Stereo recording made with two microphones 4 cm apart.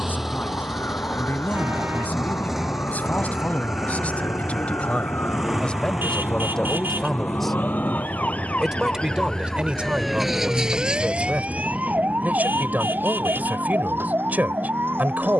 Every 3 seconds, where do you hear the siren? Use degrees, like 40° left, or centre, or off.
80° left, 70° left, 50° left, 10° right, 60° right.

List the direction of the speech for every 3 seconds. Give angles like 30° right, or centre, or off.
50° left, 30° left, 10° left, 30° right, 50° right.